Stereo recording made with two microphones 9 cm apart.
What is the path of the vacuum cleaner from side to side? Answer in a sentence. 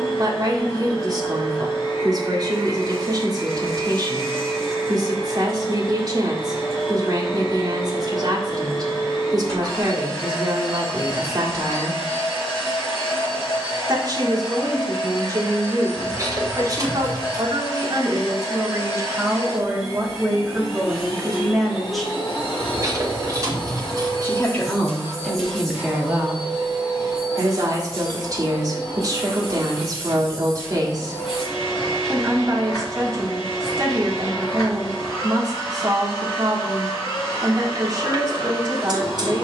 In this clip you hear the vacuum cleaner stay in one place.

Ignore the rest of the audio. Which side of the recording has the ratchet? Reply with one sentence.
In this clip you hear the ratchet on the right.